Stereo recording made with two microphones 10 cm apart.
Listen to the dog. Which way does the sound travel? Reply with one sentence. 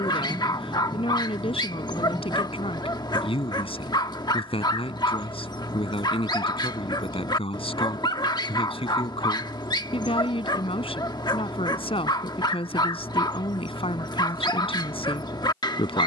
You can hear the dog stay put.